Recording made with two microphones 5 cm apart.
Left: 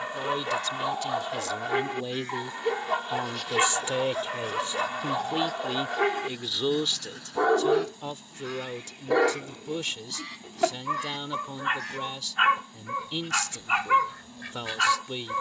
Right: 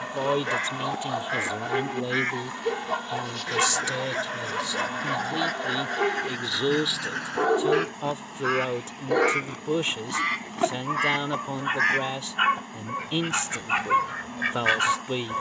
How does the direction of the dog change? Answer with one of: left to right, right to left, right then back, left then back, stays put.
stays put.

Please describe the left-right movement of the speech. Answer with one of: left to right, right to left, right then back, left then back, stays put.
left then back.